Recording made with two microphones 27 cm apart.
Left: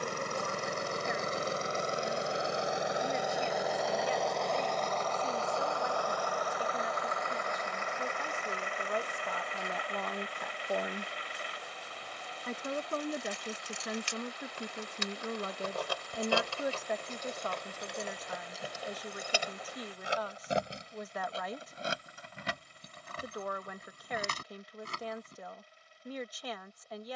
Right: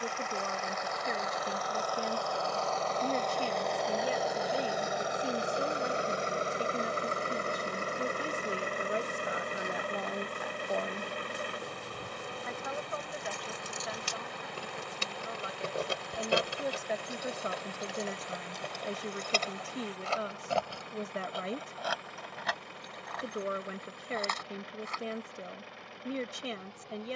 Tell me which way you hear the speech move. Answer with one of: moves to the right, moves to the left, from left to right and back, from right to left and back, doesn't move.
from right to left and back.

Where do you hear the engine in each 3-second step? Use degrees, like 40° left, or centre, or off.
30° left, 10° right, 30° right, 50° right, 60° right, 70° right, 70° right, 70° right, 70° right.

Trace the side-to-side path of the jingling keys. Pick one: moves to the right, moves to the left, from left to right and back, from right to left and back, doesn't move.
moves to the left.